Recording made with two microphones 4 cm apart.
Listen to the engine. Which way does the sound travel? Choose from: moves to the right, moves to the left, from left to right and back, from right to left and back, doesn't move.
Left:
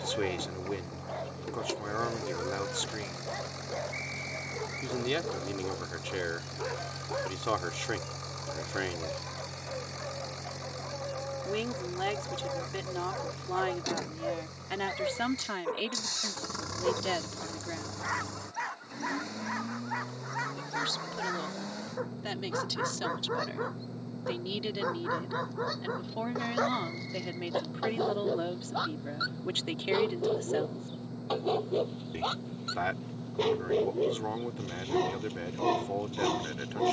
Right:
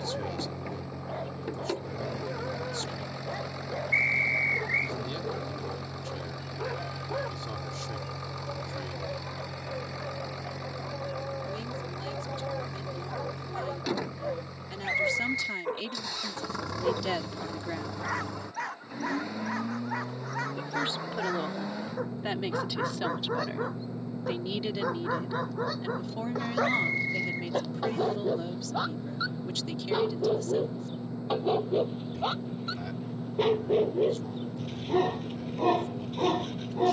doesn't move.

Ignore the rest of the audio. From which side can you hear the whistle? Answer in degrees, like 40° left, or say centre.
70° right.